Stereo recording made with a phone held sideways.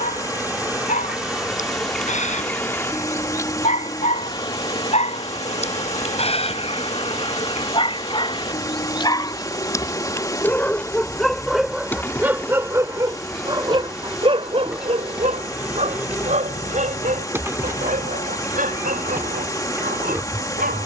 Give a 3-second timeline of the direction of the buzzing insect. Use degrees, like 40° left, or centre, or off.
centre, 40° left, 40° left, 30° left, centre, 10° right, 20° right.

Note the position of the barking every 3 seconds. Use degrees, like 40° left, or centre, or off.
60° left, 50° left, 40° left, 10° left, 30° right, 60° right, 70° right.